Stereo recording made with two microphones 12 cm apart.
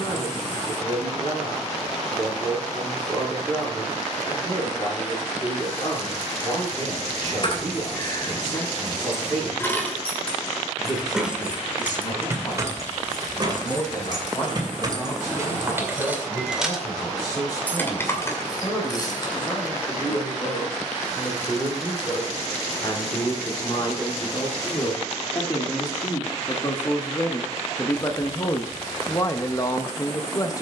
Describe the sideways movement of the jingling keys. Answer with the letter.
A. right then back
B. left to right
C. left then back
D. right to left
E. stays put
A.